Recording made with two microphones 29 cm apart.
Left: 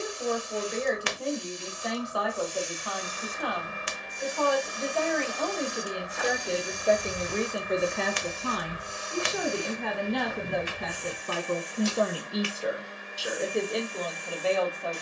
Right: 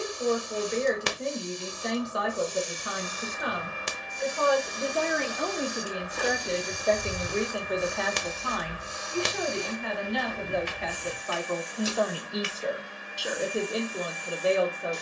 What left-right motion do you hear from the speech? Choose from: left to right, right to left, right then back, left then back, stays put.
left then back.